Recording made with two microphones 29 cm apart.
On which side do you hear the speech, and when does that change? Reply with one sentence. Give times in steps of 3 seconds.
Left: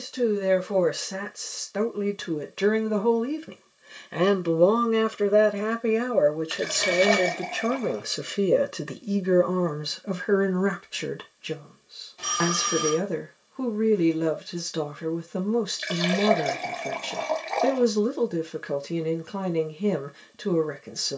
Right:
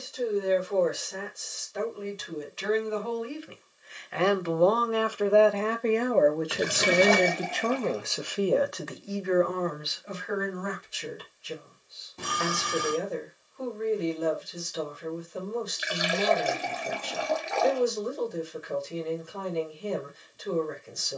In this clip you hear the speech on the left from 0 s, in the centre from 6 s and on the left from 9 s.